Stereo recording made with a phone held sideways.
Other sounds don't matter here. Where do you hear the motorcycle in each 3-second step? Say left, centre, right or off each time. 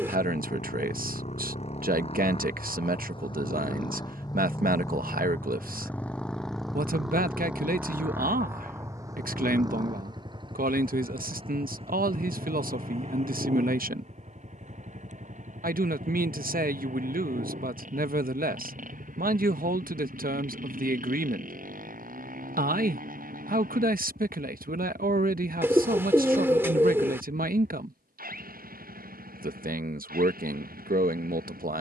left, left, centre, right, right, right, right, right, right, right, right.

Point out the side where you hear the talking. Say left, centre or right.
right.